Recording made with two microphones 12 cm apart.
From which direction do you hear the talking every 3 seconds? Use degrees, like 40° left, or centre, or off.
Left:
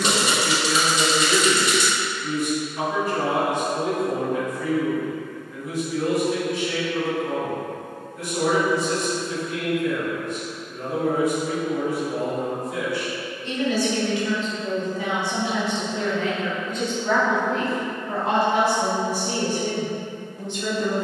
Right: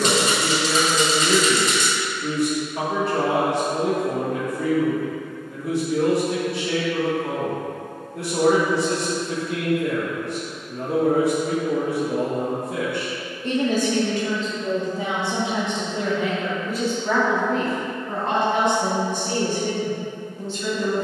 70° right, 70° right, 70° right, 70° right, 50° right, 10° right, 10° left.